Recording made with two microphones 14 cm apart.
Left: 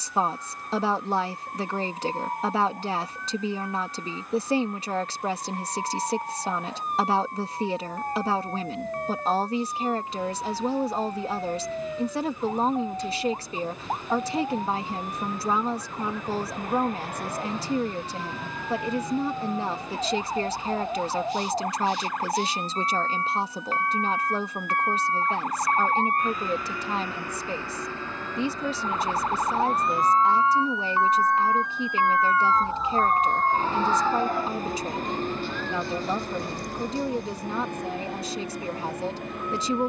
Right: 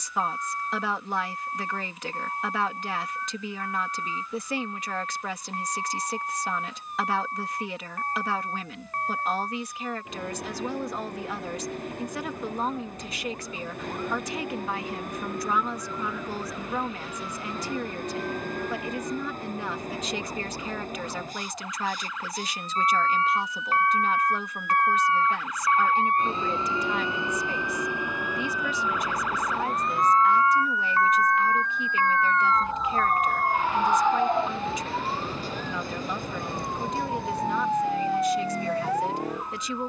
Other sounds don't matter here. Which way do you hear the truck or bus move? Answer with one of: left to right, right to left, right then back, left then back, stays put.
right to left.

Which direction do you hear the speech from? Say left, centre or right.
left.